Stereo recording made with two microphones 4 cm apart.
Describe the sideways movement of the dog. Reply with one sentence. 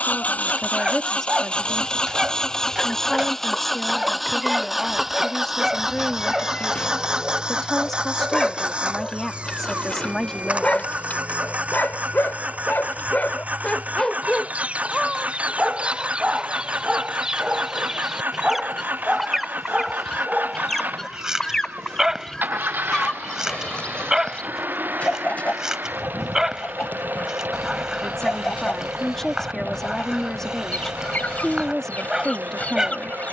You can hear the dog move from right to left and back again.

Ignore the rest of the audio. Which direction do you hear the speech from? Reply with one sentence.
You can hear the speech in the centre.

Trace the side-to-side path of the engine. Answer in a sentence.
In this clip you hear the engine go from the left side to the right.